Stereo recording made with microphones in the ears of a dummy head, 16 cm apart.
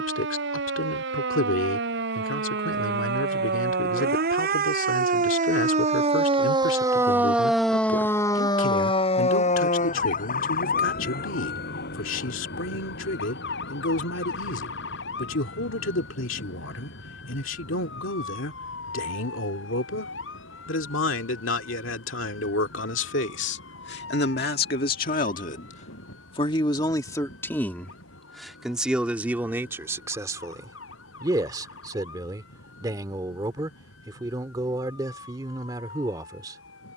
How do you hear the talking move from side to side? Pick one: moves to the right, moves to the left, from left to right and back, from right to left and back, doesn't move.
moves to the right.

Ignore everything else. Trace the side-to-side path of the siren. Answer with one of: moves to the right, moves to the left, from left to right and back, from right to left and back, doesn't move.
moves to the left.